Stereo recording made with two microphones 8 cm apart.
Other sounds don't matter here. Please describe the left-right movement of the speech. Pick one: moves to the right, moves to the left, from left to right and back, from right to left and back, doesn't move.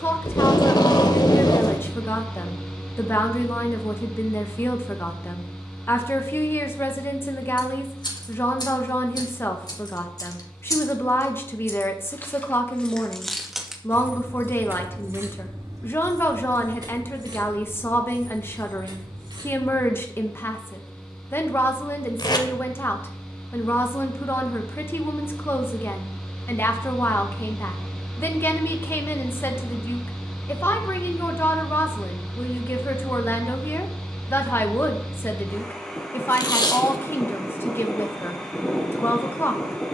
doesn't move.